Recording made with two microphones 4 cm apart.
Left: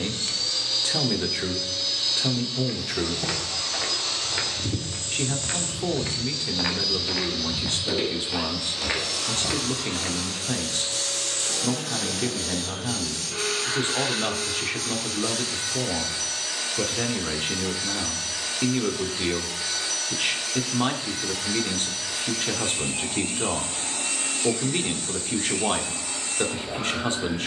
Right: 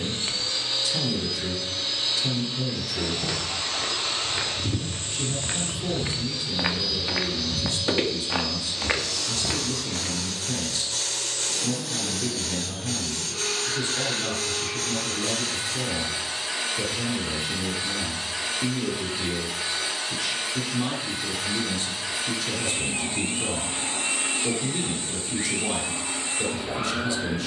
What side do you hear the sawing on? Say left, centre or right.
right.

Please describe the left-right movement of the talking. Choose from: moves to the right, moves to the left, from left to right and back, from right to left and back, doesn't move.
doesn't move.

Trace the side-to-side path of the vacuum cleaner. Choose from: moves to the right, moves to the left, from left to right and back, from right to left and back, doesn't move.
from right to left and back.